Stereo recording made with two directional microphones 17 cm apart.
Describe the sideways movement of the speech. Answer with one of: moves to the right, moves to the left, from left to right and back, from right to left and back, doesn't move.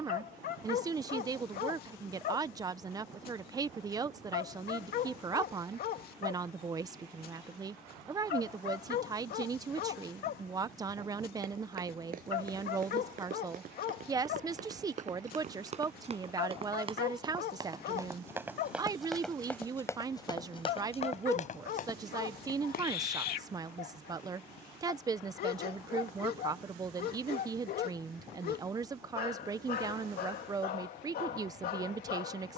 doesn't move.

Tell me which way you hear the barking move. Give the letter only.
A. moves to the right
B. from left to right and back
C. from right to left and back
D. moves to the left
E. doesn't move
E.